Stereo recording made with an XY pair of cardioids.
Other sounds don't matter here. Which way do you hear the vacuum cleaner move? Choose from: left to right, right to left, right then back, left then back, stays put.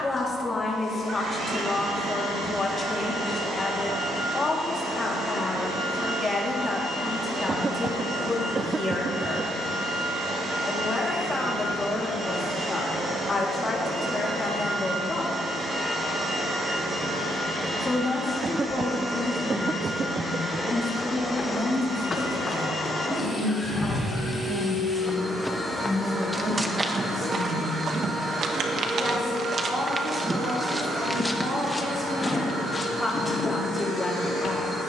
left then back.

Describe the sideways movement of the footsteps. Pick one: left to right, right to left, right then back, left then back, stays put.
right then back.